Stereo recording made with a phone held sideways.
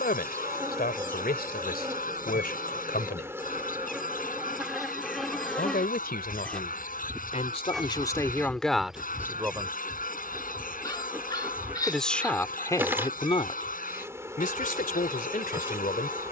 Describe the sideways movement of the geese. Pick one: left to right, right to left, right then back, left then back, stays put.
stays put.